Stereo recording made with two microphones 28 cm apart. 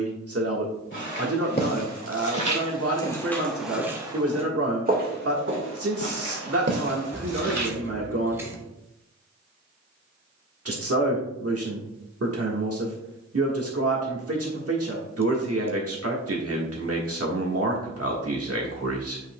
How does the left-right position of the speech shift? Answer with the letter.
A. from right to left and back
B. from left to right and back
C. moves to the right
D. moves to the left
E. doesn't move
E.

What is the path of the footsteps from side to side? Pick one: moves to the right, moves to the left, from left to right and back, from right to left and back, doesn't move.
moves to the right.